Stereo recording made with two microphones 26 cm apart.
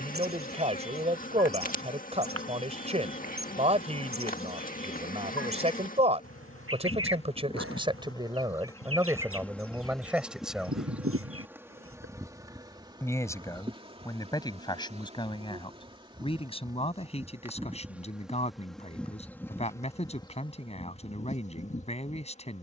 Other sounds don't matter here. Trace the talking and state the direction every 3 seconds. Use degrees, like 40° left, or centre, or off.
20° right, 20° right, 20° right, 10° right, 10° left, 20° left, 20° left, 20° left.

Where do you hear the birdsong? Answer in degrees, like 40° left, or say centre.
60° right.